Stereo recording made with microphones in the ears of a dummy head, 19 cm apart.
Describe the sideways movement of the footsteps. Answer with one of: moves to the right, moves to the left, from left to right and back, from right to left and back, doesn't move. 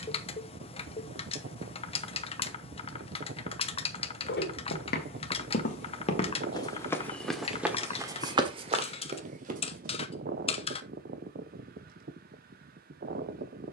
moves to the right.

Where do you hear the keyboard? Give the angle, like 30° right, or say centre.
30° left.